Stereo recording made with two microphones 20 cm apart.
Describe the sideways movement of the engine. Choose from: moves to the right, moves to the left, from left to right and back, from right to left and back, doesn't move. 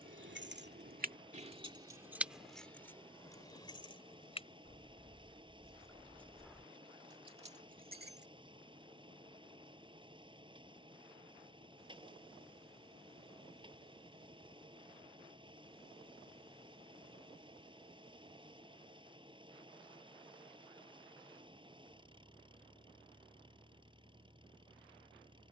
doesn't move.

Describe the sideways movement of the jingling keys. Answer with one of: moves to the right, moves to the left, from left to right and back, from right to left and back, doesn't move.
from right to left and back.